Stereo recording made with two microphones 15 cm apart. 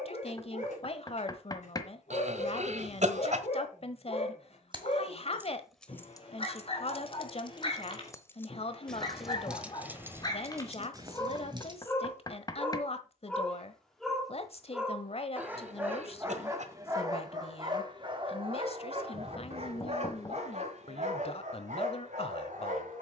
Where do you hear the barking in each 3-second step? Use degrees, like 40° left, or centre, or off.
50° left, 50° left, 40° left, 30° left, 10° left, 20° right, 40° right, 60° right.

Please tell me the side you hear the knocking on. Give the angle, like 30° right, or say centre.
30° left.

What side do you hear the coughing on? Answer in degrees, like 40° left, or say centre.
50° right.